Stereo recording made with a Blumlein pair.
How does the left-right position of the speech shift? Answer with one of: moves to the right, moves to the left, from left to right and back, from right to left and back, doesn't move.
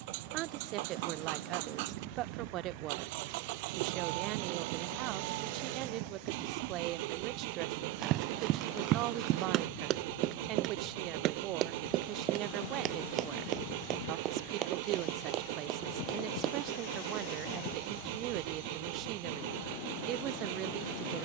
doesn't move.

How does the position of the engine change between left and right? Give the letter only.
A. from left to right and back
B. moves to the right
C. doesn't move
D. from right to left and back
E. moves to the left
C.